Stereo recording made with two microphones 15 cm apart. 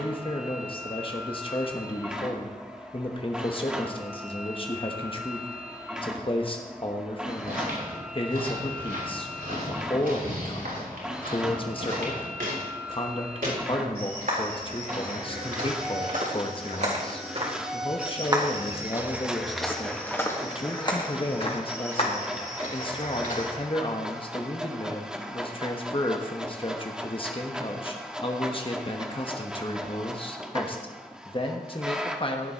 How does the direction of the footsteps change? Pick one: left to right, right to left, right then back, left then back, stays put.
right to left.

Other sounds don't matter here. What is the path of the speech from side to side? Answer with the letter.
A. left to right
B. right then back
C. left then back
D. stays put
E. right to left
D.